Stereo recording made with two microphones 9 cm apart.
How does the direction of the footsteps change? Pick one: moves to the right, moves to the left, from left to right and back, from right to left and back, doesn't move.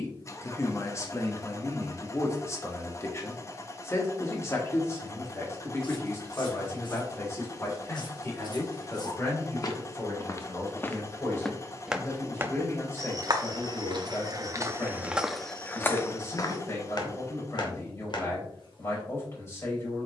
from left to right and back.